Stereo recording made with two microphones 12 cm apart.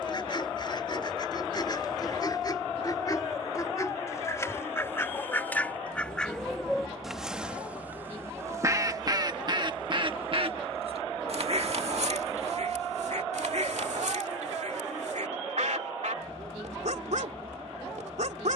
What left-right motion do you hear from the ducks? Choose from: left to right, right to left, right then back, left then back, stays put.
left to right.